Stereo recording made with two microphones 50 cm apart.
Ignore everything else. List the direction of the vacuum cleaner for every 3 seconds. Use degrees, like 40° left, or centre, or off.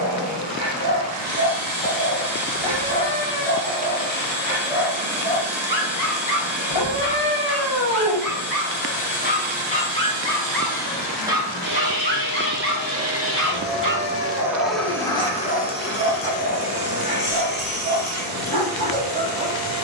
60° right, 60° right, 60° right, 60° right, 20° right, 30° left, 40° left.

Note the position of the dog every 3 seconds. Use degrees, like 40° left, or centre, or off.
60° right, 20° right, 30° left, centre, 30° right, 60° right, 60° right.